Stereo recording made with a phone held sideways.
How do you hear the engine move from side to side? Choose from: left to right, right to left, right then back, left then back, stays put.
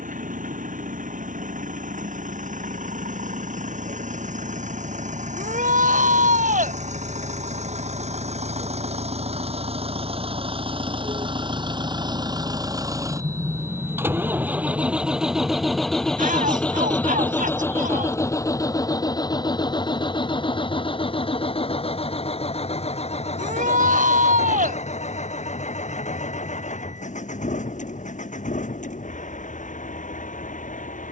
right to left.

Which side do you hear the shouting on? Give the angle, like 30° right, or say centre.
70° right.